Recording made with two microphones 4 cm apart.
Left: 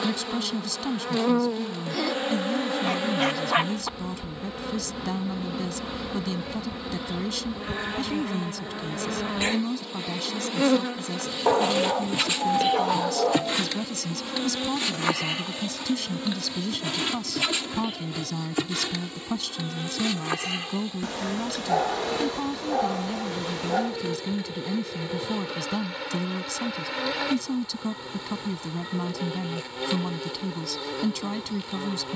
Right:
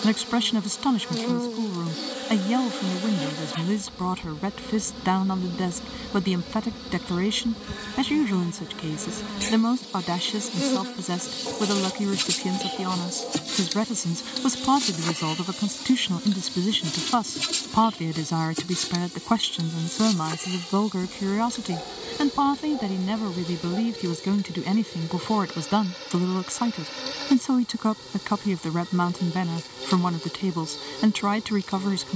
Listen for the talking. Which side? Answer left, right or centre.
right.